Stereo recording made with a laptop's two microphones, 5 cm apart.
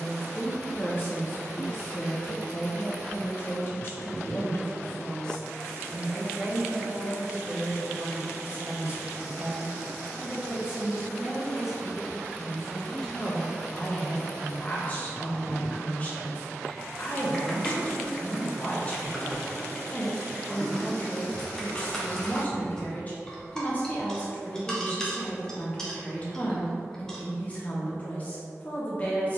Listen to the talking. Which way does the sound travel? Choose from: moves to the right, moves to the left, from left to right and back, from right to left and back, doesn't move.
from left to right and back.